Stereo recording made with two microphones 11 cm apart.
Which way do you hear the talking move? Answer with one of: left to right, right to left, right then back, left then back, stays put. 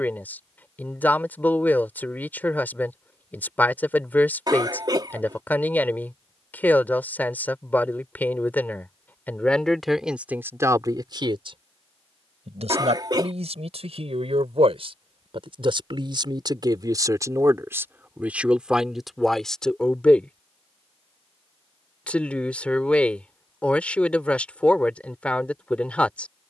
right then back.